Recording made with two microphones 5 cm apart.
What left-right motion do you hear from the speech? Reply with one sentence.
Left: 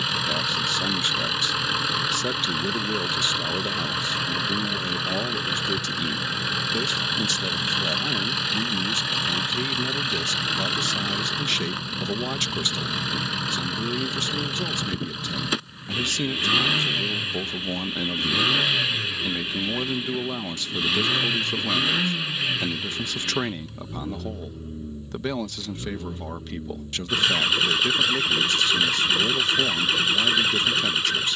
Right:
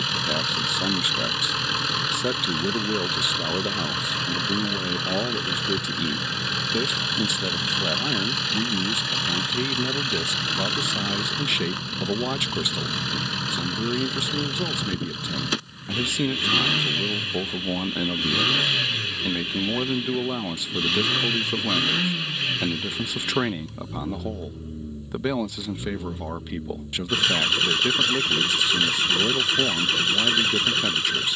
You can hear the speech stay put.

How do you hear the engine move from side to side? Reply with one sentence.
In this clip you hear the engine stay in one place.